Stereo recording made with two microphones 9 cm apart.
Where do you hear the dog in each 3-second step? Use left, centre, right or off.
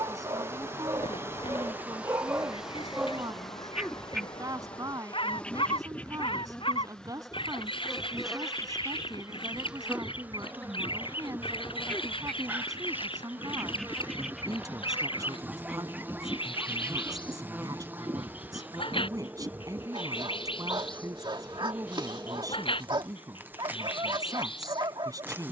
right, centre, left, left, centre, right, right, right, right.